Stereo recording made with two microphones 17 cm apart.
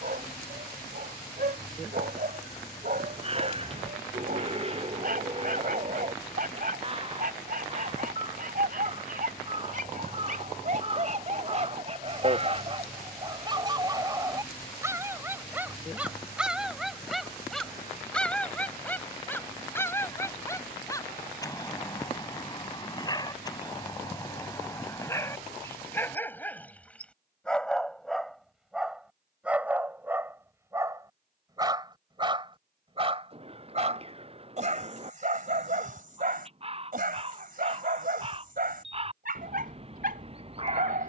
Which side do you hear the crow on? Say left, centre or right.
right.